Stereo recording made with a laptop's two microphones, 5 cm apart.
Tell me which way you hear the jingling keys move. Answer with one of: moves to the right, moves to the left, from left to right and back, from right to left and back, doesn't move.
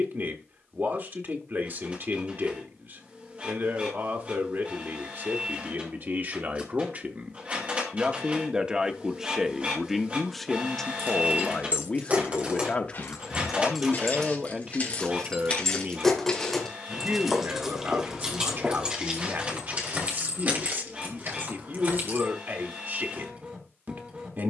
from right to left and back.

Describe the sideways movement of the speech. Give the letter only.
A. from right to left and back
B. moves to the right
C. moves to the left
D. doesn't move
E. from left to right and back
A.